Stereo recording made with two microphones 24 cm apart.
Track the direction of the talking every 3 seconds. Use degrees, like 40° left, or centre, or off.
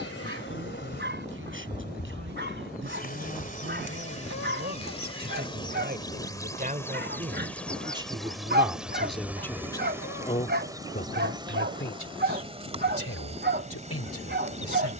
50° right, 50° right, 20° right, 30° left, 70° left.